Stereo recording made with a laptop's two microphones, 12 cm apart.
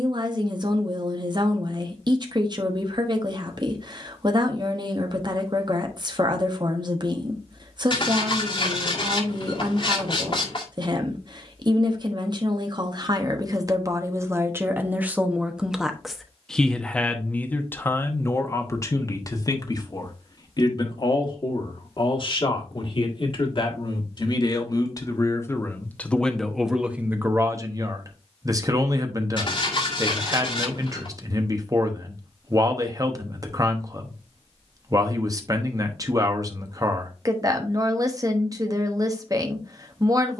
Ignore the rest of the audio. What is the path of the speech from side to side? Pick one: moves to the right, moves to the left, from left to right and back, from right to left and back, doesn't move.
from right to left and back.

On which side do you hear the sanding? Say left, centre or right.
left.